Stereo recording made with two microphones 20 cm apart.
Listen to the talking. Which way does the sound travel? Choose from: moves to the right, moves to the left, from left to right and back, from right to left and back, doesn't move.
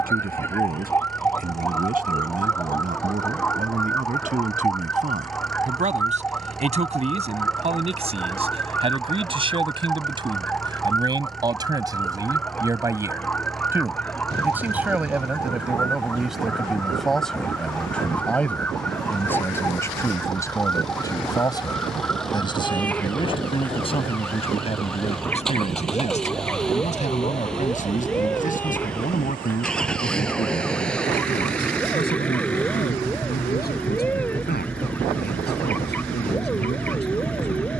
moves to the left.